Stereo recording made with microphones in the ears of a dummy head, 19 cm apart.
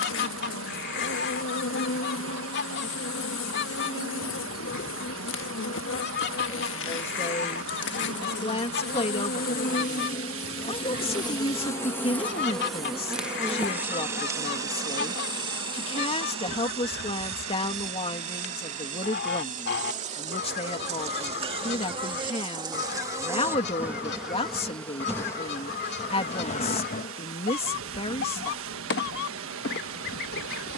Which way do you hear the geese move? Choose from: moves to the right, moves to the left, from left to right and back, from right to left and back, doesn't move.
doesn't move.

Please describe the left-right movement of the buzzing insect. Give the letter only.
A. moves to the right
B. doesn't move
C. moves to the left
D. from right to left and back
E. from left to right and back
E.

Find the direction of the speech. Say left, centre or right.
left.